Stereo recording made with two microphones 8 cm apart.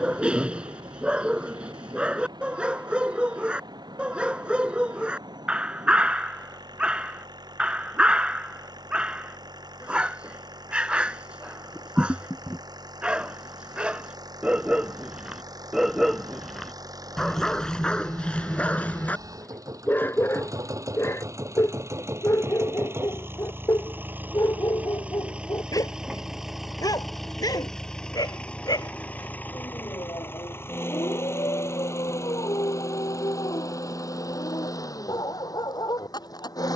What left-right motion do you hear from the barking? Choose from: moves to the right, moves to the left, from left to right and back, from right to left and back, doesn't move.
moves to the left.